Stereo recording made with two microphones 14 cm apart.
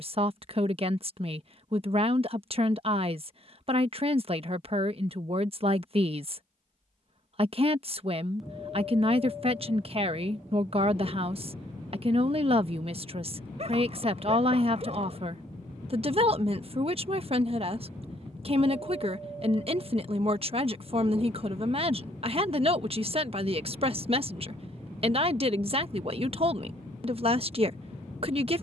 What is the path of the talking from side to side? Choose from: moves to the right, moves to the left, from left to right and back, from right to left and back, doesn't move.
doesn't move.